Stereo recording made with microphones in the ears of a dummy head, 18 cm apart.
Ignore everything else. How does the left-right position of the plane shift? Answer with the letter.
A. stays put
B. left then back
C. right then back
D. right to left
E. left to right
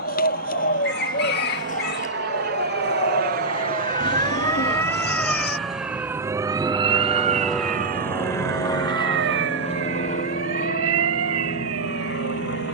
D.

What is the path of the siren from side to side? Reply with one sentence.
You can hear the siren move from left to right.